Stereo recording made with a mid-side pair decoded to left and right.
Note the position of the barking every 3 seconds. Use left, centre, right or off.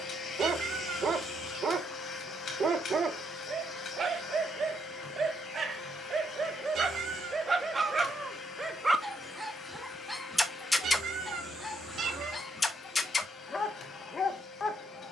right, right, right, centre, left.